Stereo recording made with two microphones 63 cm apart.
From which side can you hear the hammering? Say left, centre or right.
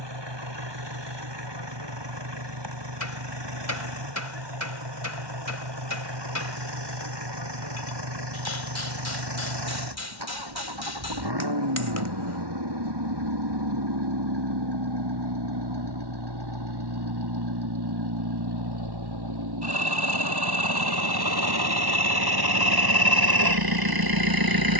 left.